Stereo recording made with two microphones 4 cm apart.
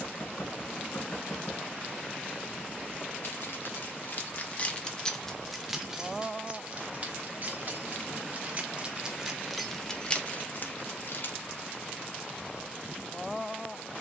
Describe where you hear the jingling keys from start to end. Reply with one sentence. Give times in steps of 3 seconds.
You can hear the jingling keys not at all from 0 s, on the left from 3 s, on the right from 6 s, on the left from 9 s and not at all from 12 s.